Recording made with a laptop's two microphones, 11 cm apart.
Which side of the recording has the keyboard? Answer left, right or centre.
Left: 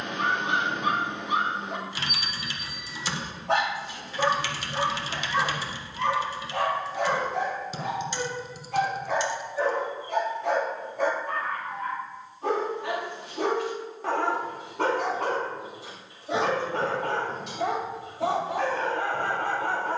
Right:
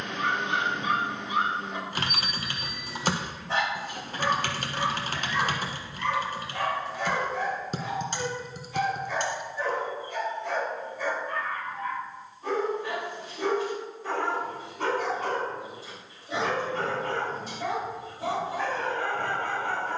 right.